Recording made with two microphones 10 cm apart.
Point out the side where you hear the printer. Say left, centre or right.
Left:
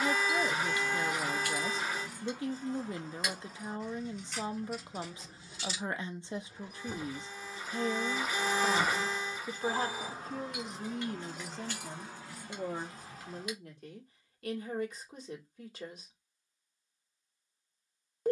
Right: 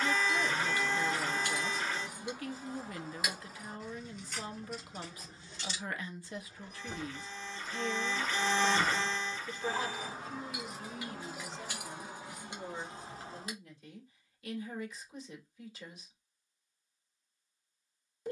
centre.